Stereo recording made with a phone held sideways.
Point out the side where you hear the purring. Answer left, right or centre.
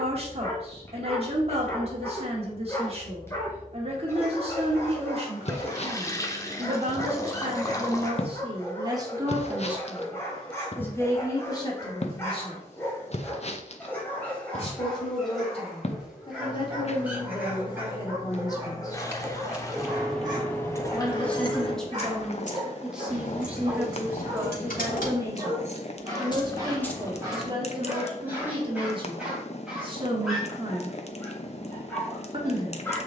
left.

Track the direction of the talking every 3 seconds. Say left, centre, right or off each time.
right, right, right, centre, left, left, left, centre, right, right, right.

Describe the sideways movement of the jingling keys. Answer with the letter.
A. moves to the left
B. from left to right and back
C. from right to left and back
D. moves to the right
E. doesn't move
C.